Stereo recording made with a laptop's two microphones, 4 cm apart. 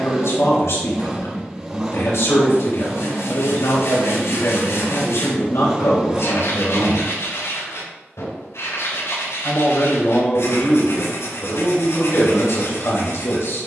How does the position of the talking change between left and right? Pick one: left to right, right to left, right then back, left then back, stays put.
stays put.